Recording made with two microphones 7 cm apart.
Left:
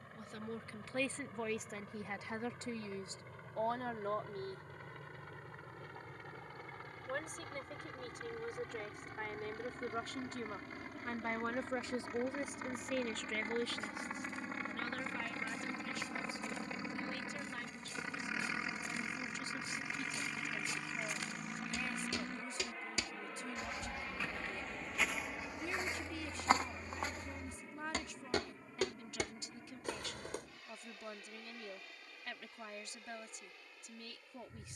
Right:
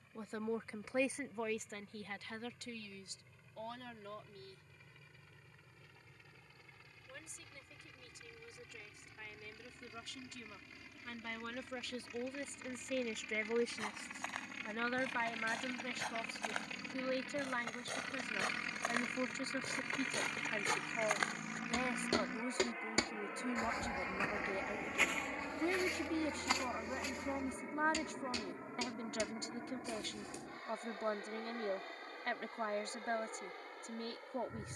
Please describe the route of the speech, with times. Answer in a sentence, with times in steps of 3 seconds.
In this clip you hear the speech in the centre from 0 s, on the left from 3 s, in the centre from 12 s and on the right from 15 s.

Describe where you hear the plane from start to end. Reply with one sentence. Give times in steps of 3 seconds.
In this clip you hear the plane on the left from 0 s, in the centre from 18 s and on the right from 24 s.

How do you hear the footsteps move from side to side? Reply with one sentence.
In this clip you hear the footsteps move from right to left.